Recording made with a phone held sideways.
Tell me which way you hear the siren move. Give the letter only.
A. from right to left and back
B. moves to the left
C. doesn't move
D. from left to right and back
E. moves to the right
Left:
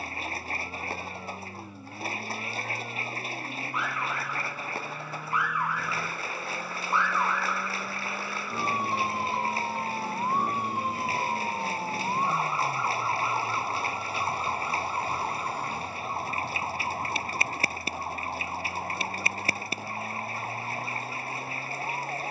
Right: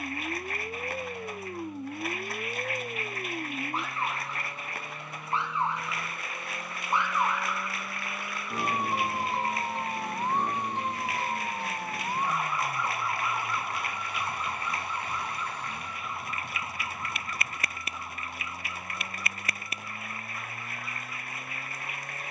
B.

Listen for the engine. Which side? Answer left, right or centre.
centre.